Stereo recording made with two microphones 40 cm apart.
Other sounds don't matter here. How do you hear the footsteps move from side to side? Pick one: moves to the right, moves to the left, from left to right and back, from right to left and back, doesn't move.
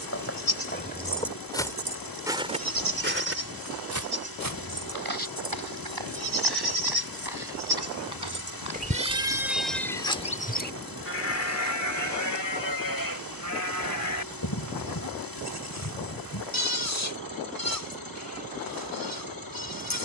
moves to the right.